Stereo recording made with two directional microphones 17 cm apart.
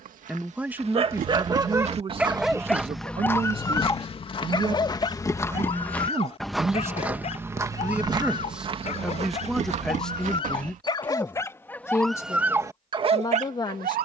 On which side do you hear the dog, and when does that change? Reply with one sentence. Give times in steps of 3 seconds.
In this clip you hear the dog on the right from 0 s, on the left from 3 s and on the right from 12 s.